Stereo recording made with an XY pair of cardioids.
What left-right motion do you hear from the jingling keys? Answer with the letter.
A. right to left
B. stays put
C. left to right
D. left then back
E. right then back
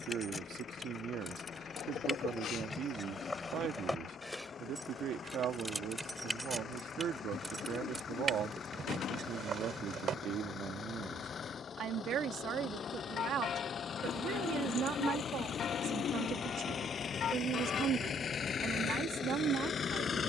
C.